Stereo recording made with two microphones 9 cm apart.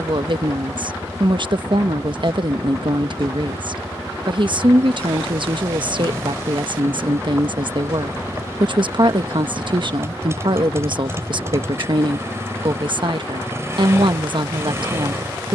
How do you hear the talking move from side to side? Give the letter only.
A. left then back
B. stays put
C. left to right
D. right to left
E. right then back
B.